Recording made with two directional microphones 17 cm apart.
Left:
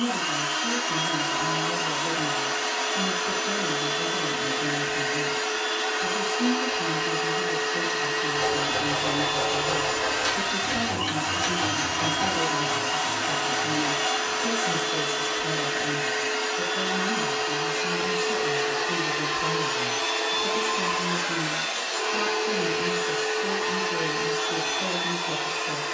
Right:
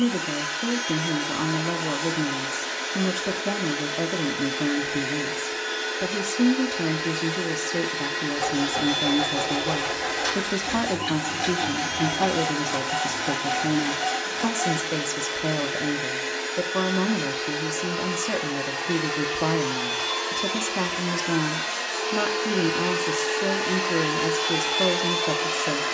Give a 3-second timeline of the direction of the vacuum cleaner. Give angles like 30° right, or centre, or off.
50° left, 50° left, 50° left, 50° left, 50° left, 50° left, 30° left, 10° left, 20° right.